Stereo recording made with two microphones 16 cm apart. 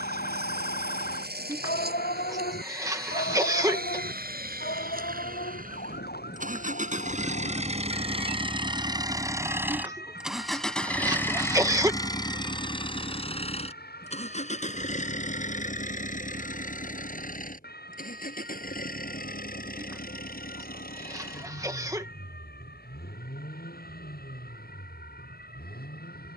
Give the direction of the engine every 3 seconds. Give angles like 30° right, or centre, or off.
80° right, 70° right, 40° right, centre, 40° left, 50° left, 60° left, 70° left, 70° left.